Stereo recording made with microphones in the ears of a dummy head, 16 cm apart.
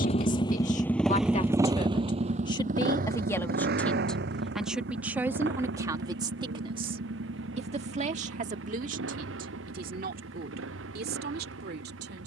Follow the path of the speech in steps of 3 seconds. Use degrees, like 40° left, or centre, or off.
30° left, centre, 30° right, 50° right.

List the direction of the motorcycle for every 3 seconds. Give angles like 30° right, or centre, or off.
10° right, 60° right, 70° right, 80° right.